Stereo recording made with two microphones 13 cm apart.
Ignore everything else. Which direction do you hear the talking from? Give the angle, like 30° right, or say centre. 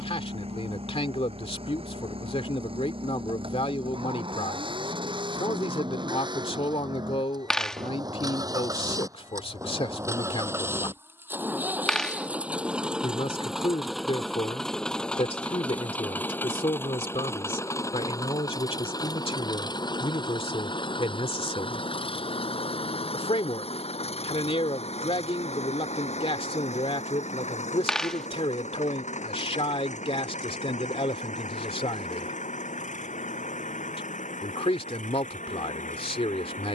50° left.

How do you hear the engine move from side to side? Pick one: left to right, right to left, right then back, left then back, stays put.
right to left.